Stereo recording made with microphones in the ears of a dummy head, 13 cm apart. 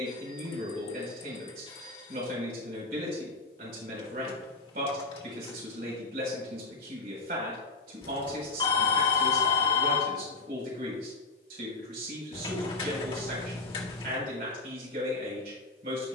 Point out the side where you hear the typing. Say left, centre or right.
left.